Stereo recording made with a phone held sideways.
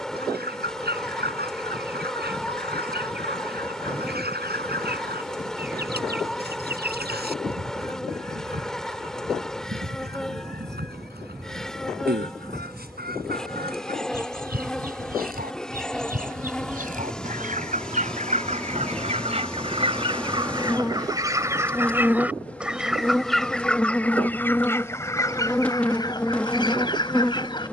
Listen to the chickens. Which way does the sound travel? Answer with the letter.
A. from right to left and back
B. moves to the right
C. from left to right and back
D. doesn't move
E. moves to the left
E.